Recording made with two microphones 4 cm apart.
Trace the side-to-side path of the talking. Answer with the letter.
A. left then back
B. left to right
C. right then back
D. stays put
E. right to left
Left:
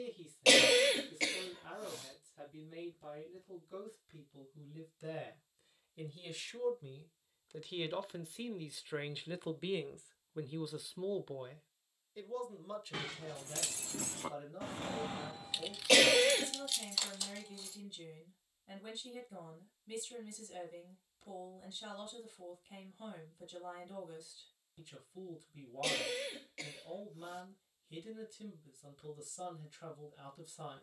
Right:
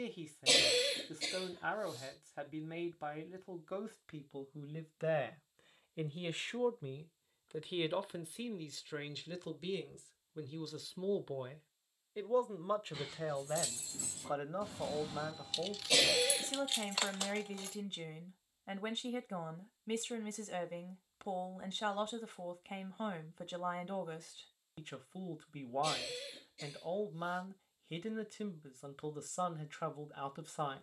A.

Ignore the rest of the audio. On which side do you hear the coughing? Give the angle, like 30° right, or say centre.
60° left.